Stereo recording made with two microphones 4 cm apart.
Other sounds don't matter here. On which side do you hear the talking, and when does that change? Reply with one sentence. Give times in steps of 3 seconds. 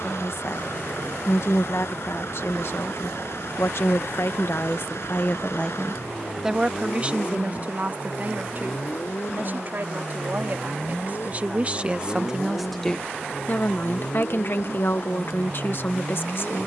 In this clip you hear the talking on the left from 0 s, on the right from 6 s and on the left from 12 s.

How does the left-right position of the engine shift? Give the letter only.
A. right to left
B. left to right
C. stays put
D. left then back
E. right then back
C.